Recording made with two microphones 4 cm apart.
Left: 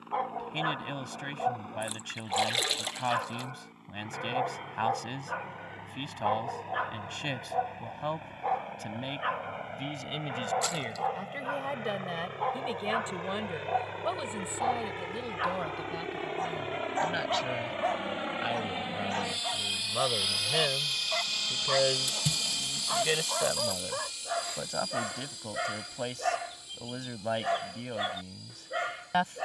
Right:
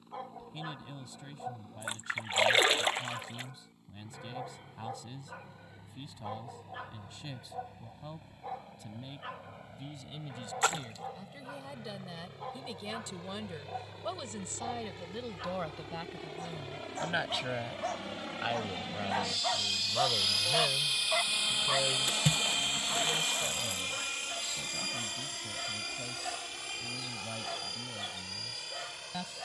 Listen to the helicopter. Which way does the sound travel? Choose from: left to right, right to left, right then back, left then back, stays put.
left to right.